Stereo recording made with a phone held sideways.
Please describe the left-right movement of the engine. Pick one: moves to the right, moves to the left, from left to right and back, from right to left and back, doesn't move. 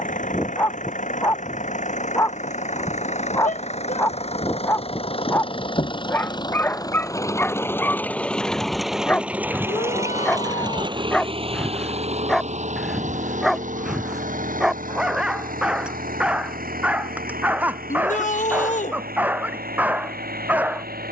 moves to the right.